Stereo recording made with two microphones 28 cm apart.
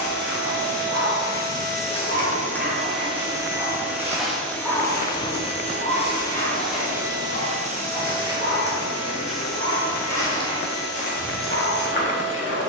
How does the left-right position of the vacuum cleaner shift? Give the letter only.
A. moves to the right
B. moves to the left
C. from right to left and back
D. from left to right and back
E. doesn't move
C.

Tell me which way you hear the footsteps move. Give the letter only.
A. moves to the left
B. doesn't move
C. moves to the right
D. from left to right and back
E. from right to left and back
D.